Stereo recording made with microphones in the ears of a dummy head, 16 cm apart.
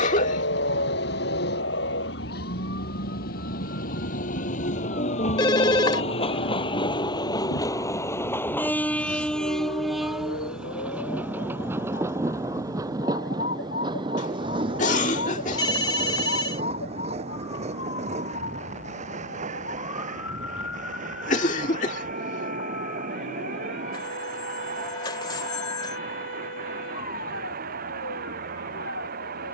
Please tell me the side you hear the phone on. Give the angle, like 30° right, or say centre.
20° left.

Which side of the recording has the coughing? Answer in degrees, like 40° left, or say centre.
40° left.